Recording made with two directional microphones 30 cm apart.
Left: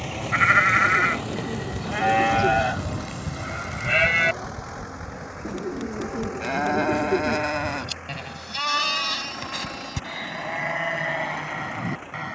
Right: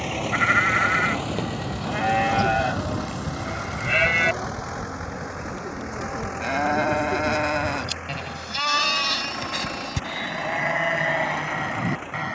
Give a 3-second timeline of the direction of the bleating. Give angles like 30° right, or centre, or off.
10° left, centre, 20° right, 30° right.